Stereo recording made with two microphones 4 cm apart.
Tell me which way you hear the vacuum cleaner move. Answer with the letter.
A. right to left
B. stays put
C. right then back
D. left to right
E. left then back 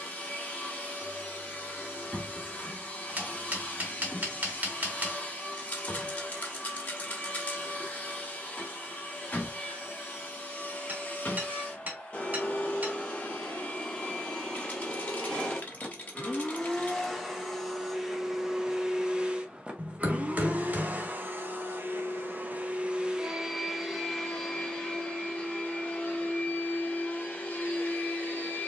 C.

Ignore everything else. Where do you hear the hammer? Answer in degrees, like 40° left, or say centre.
40° right.